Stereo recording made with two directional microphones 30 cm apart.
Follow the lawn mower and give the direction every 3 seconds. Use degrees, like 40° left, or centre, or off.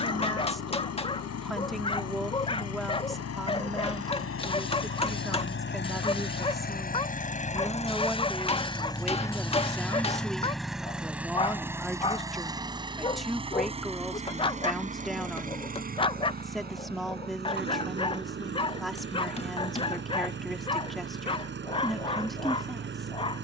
60° left, 50° left, 20° left, centre, 20° right, 30° right, 40° right, 40° right.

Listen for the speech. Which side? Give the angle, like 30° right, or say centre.
centre.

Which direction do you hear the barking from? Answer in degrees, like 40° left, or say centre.
20° left.